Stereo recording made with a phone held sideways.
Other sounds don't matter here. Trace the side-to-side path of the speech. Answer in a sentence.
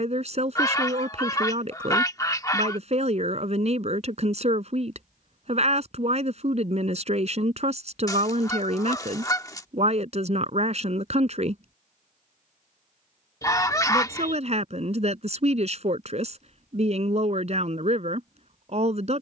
In this clip you hear the speech stay put.